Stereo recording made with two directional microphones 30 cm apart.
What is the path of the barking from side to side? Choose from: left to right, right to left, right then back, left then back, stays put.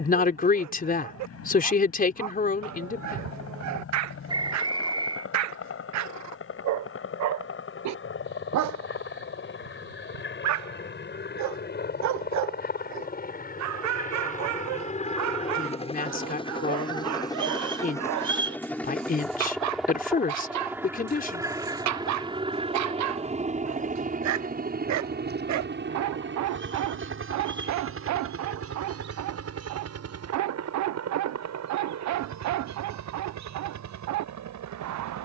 stays put.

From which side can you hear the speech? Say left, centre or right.
left.